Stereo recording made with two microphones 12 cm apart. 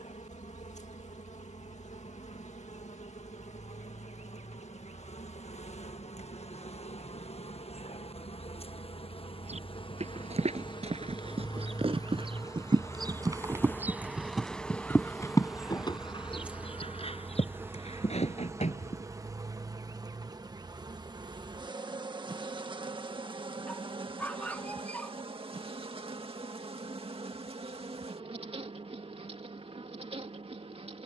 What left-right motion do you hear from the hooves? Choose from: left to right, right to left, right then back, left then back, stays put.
right to left.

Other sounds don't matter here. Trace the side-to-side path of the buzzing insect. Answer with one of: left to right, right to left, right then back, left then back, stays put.
left to right.